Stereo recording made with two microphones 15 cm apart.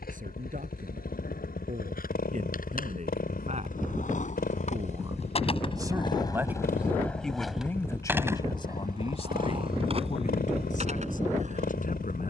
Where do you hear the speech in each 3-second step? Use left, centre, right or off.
right, right, centre, left.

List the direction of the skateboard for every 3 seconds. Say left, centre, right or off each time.
left, left, centre, right.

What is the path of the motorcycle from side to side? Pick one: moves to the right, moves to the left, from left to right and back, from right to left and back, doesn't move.
doesn't move.